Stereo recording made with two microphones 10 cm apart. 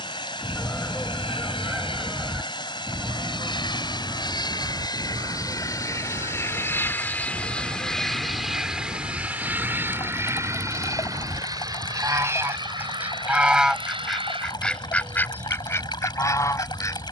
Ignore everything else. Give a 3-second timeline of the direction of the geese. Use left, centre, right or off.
centre, right, right, right, centre, left.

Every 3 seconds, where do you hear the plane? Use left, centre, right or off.
left, left, centre, right, right, right.